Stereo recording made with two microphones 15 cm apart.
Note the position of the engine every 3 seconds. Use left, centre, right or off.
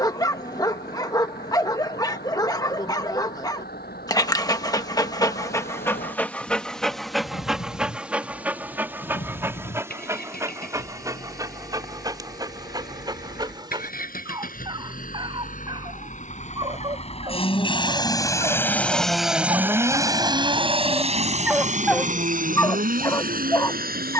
left, left, left, left, left, left, centre, right.